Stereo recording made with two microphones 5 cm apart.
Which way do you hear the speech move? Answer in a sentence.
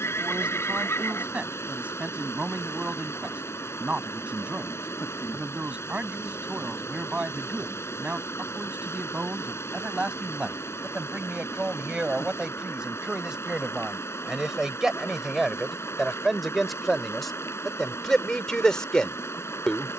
You can hear the speech go from the right side to the left.